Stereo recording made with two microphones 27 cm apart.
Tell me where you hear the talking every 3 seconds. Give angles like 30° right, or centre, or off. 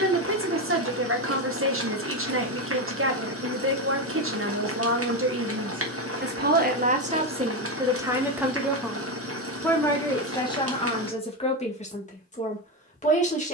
50° right, 50° right, 20° right, 20° left, 30° left.